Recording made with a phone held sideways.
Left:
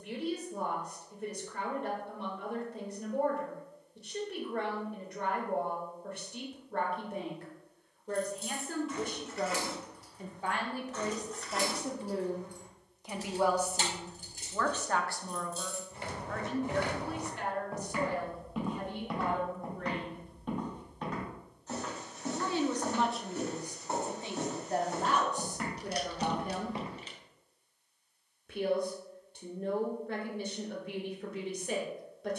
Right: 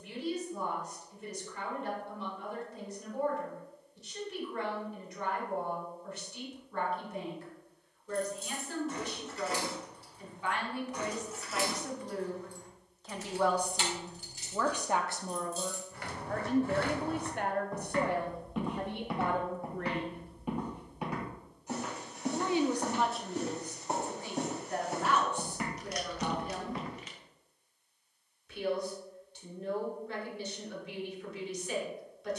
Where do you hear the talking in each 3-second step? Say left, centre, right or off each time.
left, left, left, left, centre, right, right, centre, left, left, left.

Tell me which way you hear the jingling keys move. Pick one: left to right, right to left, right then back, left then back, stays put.
right to left.